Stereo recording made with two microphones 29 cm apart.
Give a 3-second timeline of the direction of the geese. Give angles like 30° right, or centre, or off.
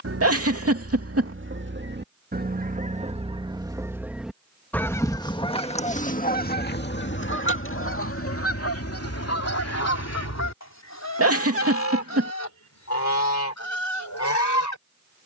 40° right, centre, 40° left, 60° left, 70° left.